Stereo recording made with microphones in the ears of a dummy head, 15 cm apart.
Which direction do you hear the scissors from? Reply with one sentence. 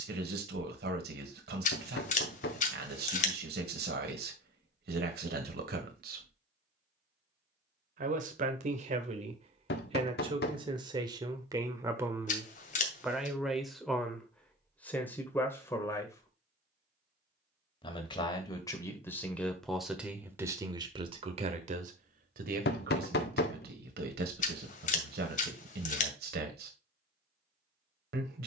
You can hear the scissors on the left.